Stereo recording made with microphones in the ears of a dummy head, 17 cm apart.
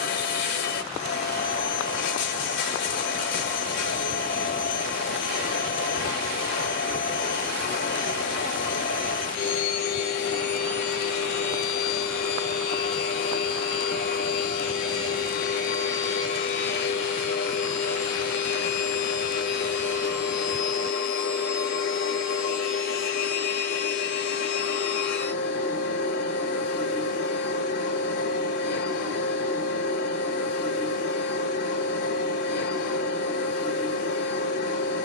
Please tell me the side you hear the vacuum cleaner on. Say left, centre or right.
left.